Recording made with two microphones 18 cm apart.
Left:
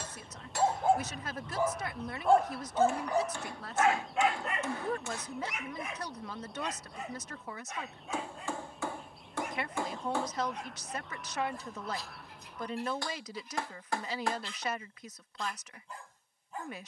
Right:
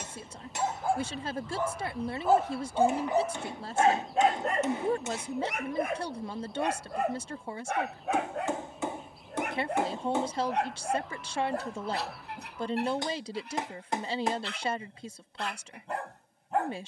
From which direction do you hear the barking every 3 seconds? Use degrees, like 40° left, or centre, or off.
10° left, 40° right, 70° right, 70° right, 70° right, 70° right.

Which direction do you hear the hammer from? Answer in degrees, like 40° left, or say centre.
20° right.